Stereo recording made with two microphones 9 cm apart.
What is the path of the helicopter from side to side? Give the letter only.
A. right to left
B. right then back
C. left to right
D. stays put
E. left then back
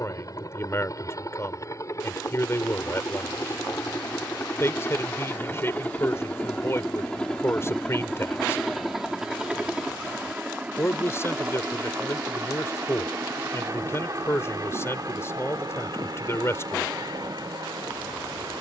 C.